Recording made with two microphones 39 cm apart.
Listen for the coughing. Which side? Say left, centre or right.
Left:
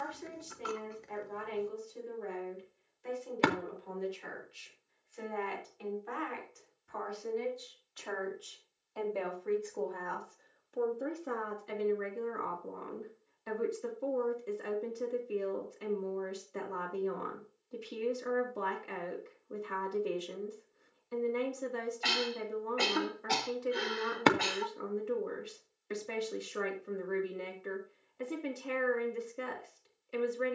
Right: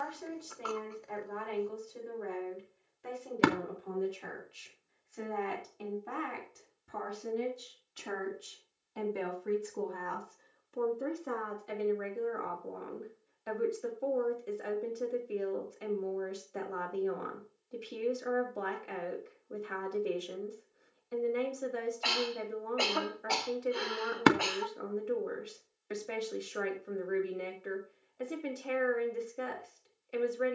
left.